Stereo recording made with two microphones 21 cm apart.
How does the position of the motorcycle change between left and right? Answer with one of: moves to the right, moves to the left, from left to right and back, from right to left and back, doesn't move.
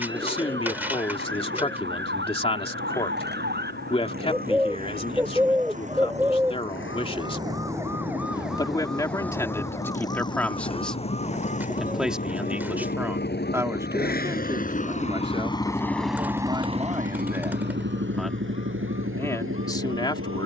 moves to the right.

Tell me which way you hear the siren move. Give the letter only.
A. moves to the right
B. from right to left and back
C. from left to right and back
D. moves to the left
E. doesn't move
D.